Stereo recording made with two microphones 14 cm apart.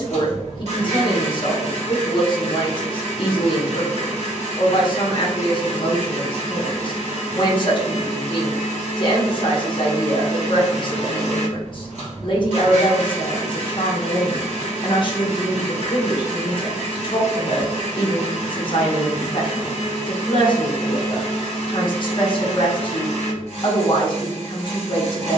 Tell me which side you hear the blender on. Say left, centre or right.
right.